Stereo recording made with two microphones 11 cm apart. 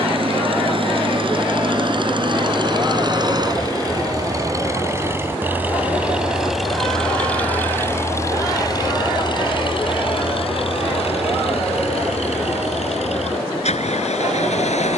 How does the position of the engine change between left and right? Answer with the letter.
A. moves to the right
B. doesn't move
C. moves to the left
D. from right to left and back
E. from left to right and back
C.